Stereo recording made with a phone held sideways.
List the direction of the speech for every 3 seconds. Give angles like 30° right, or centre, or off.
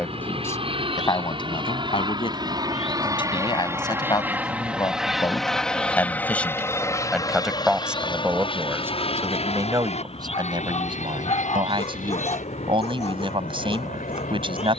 30° left, 30° left, centre, 30° right, 40° right.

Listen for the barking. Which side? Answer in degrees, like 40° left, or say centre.
50° left.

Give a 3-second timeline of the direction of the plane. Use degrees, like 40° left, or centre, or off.
40° right, 10° right, 30° left, 50° left, 60° left.